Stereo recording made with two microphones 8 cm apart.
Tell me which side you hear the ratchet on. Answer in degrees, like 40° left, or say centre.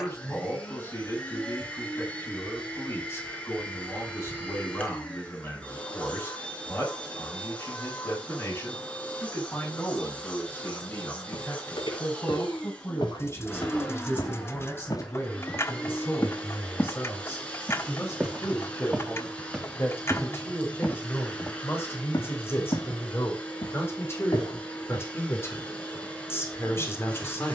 30° left.